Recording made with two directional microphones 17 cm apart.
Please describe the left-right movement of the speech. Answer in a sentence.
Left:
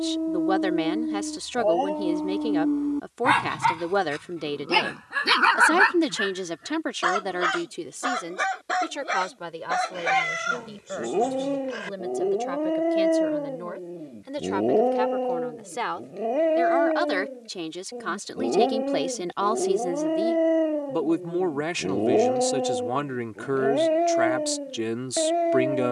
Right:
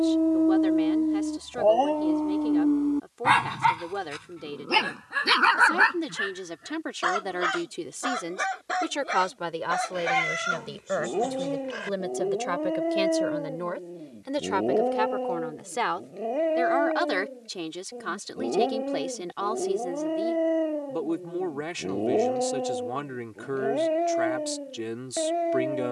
You can hear the speech move from left to right and back again.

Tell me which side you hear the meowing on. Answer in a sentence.
You can hear the meowing in the centre.